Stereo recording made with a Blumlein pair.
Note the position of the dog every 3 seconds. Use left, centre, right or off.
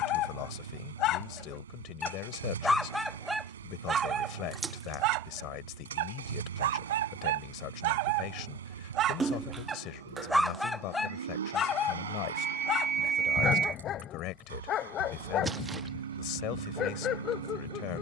left, right, right, centre, left, left.